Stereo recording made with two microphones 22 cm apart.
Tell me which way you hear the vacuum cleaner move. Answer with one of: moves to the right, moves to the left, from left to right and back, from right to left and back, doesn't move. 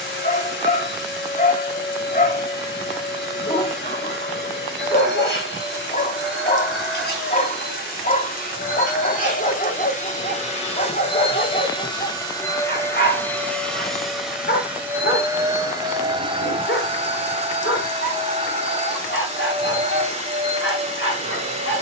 moves to the right.